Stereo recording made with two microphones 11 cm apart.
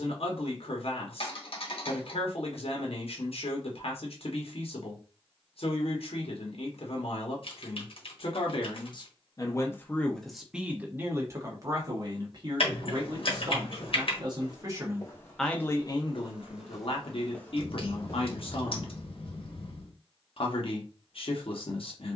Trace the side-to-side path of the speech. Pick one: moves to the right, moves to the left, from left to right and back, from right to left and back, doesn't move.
from left to right and back.